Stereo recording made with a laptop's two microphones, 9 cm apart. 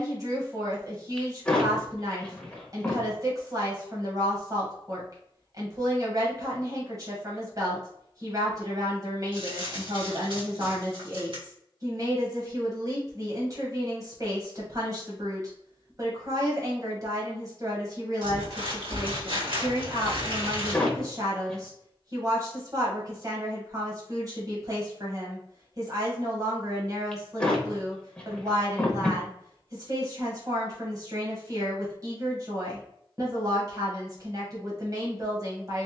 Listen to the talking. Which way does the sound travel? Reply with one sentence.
You can hear the talking stay in one place.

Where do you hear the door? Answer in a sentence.
You can hear the door in the centre.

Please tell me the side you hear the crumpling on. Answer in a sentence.
In this clip you hear the crumpling on the right.